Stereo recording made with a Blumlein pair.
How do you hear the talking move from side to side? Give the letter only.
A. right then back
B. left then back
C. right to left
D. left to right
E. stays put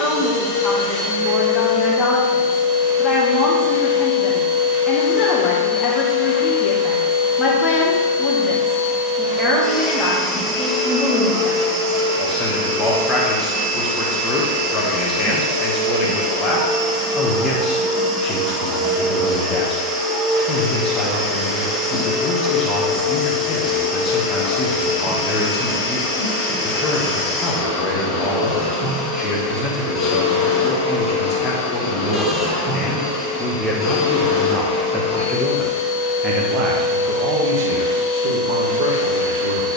D.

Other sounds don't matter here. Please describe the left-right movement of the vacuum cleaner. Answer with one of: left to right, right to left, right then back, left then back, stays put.
right then back.